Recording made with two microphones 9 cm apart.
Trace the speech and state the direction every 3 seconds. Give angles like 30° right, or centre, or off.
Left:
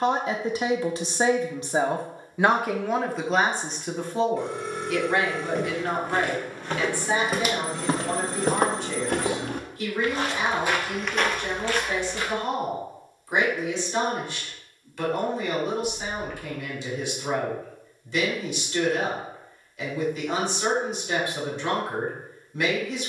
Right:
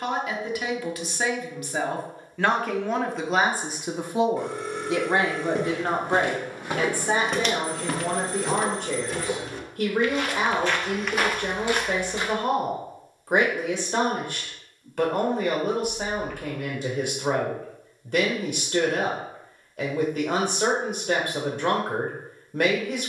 20° left, 20° right, 50° right, 60° right, 60° right, 60° right, 60° right, 60° right.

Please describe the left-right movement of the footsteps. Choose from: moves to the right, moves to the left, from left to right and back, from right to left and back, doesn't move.
from right to left and back.